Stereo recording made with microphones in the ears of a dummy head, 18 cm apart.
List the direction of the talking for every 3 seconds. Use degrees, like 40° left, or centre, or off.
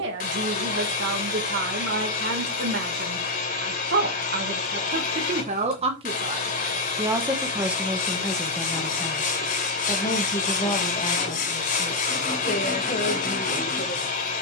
60° right, 40° right, 10° right, 20° left, 40° left.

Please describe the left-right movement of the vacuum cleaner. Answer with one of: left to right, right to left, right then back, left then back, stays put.
stays put.